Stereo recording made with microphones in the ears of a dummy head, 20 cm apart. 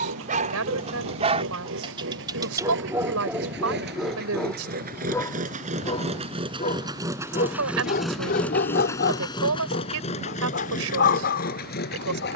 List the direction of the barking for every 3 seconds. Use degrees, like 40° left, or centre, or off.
30° right, centre, 40° left, 50° left.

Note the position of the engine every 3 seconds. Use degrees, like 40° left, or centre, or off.
60° right, 40° right, 10° right, 30° left.